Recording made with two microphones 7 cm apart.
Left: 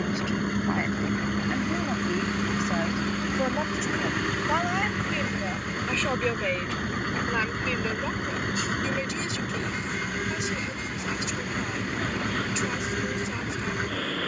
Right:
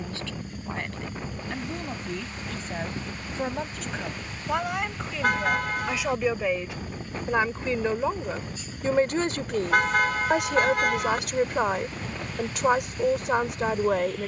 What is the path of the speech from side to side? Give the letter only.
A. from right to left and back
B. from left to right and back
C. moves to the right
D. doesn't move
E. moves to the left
C.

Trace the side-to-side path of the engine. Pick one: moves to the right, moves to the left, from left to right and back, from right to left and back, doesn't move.
doesn't move.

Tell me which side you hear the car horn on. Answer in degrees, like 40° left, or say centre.
70° right.